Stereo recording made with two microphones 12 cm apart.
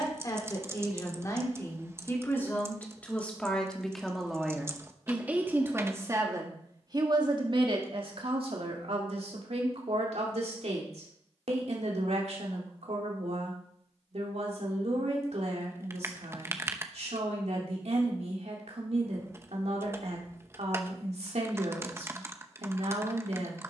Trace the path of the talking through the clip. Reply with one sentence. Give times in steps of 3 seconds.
In this clip you hear the talking on the left from 0 s, in the centre from 3 s and on the right from 6 s.